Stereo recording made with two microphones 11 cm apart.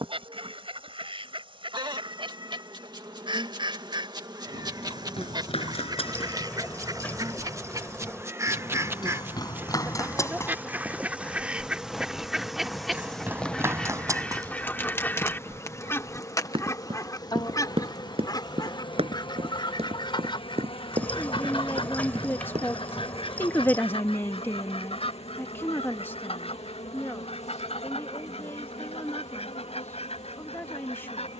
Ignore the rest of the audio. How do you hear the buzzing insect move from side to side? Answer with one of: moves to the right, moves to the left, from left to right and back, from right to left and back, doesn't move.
moves to the left.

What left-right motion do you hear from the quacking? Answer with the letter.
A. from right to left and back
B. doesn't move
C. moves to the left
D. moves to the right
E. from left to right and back
C.